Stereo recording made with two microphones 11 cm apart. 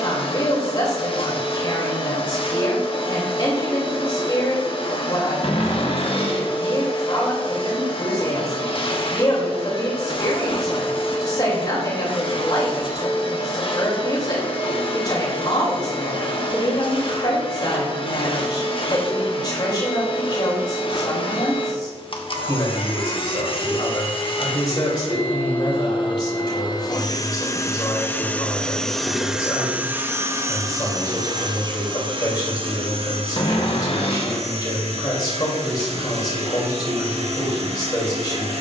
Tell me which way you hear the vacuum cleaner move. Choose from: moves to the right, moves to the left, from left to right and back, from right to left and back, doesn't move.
moves to the right.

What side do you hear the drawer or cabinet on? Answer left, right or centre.
left.